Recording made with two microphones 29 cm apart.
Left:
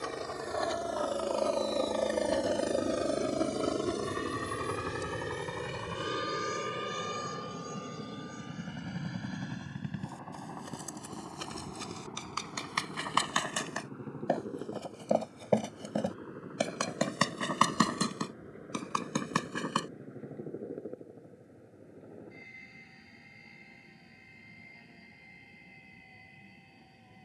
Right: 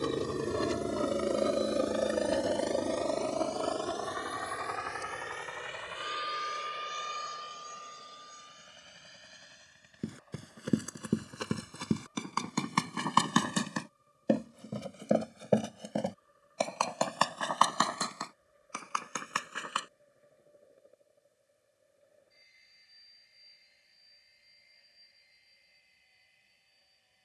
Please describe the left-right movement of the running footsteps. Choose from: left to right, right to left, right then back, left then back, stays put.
right to left.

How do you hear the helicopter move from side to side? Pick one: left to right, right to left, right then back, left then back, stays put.
right to left.